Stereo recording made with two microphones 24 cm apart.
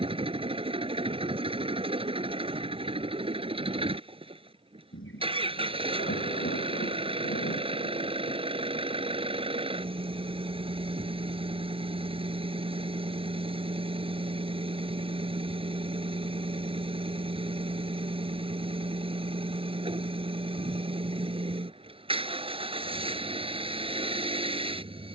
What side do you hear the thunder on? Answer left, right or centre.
left.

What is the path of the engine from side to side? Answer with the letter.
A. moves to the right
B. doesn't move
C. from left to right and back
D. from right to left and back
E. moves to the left
B.